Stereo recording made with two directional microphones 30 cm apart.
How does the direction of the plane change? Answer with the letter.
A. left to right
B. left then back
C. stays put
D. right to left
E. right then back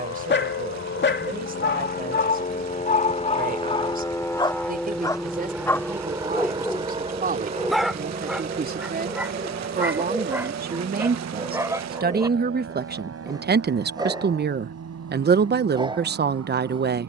A.